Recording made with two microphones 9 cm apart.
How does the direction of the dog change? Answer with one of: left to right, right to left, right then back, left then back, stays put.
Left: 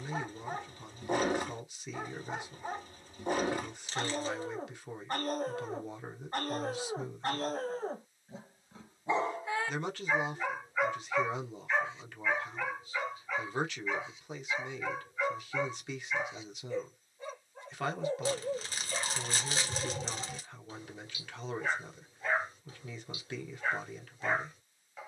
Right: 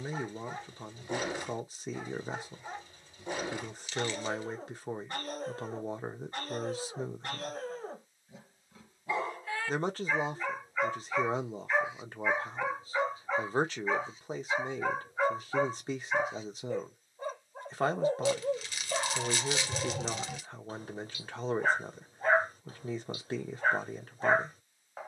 left to right.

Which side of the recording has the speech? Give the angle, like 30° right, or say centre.
40° right.